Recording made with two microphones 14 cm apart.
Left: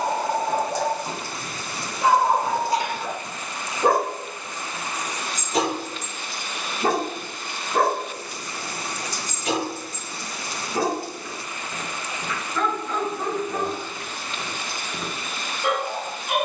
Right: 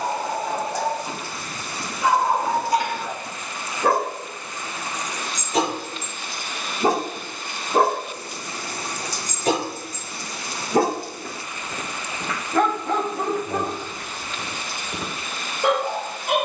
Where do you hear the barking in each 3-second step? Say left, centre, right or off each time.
left, centre, right, right, right, right.